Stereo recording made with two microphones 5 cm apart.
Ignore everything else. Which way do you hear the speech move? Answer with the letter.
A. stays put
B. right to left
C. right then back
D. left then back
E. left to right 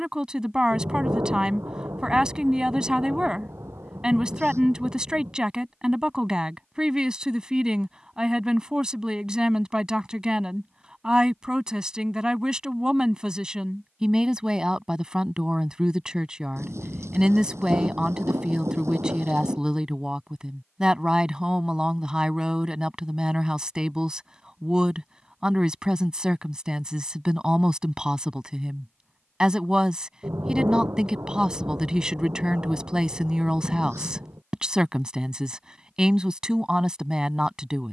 A.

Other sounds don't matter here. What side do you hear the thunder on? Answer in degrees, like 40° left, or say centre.
70° right.